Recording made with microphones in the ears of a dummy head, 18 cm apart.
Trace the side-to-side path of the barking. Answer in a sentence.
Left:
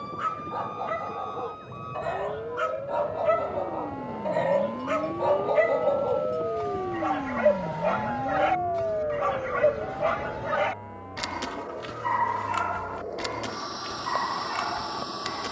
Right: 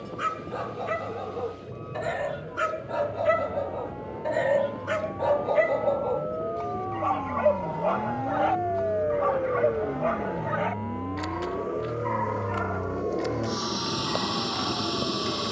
In this clip you hear the barking travel towards the left.